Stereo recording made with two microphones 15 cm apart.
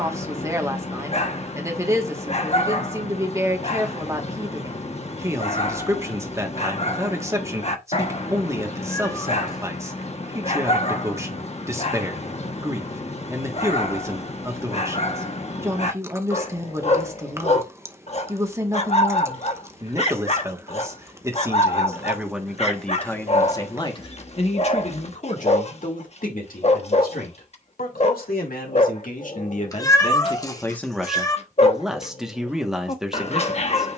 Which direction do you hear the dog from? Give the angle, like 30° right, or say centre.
40° left.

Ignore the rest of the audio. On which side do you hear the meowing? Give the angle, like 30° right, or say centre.
20° left.